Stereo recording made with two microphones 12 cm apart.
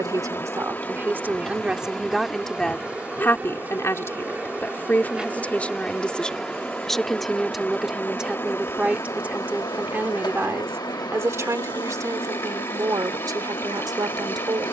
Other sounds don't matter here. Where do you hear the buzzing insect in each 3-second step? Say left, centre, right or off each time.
centre, centre, centre, left, left.